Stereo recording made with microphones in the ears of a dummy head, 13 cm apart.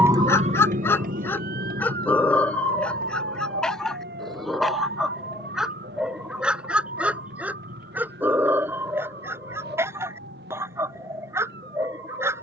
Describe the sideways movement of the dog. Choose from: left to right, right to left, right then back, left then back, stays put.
left to right.